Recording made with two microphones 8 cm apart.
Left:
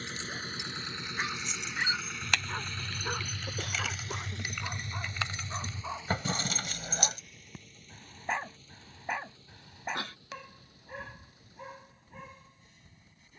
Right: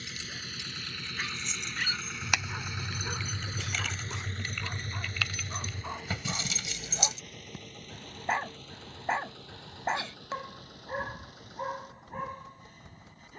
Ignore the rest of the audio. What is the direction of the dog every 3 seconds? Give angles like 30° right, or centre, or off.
30° left, 10° left, 10° right, 40° right, 60° right.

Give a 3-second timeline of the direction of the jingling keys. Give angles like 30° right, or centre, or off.
centre, 10° left, 50° left, off, off.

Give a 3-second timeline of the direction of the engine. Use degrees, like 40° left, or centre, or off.
10° left, 40° right, 60° right, 70° right, 70° right.